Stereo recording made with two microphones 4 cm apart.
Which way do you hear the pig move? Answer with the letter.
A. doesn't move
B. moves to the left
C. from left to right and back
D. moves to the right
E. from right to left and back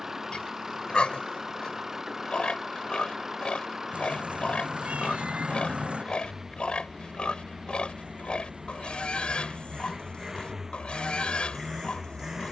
A.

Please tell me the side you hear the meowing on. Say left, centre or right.
right.